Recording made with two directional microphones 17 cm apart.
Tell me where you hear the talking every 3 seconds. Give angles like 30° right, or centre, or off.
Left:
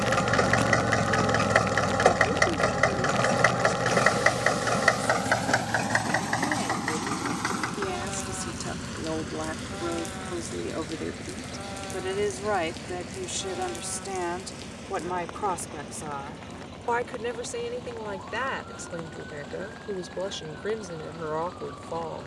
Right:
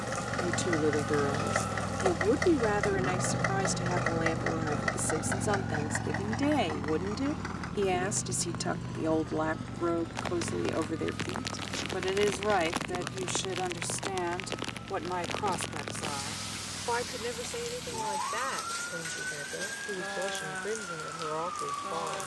50° right, 50° right, 40° right, 20° right, centre, 20° left, 30° left, 30° left.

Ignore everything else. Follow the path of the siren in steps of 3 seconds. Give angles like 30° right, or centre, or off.
20° left, 20° right, 40° right, 50° right, 50° right, 60° right, 60° right, 60° right.